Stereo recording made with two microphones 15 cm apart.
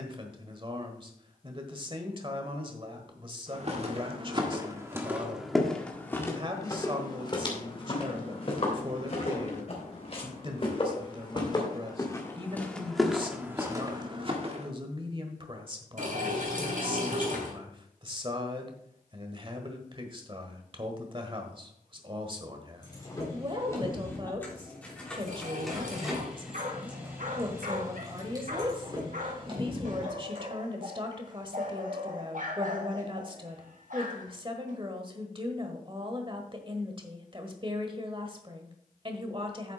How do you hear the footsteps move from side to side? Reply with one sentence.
In this clip you hear the footsteps go left and come back.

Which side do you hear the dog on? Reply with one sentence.
You can hear the dog on the right.